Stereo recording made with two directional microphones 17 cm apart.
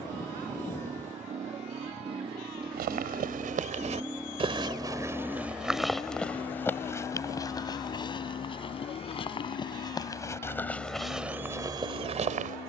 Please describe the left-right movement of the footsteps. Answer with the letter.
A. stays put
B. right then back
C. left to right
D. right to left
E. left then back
E.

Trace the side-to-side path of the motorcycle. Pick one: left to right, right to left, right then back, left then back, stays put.
right to left.